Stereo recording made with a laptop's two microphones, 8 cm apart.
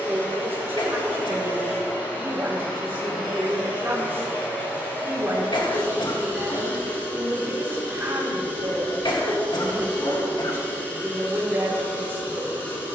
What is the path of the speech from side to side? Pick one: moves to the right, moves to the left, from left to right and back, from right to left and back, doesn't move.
doesn't move.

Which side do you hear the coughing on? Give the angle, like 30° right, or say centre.
70° left.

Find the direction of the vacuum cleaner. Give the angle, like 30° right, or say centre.
20° left.